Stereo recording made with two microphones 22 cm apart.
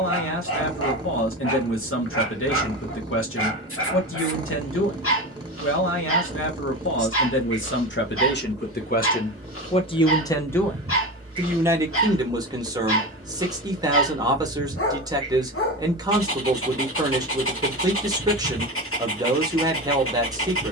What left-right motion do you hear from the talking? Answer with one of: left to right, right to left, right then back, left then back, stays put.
left to right.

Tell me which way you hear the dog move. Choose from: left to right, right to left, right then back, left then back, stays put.
stays put.